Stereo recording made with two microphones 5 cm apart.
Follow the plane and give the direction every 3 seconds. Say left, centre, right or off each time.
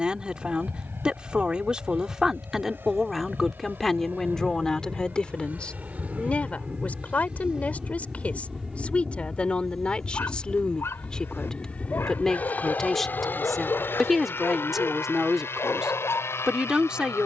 right, right, right, centre, left, left.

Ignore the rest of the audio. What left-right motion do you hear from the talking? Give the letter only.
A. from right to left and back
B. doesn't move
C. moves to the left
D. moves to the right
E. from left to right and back
A.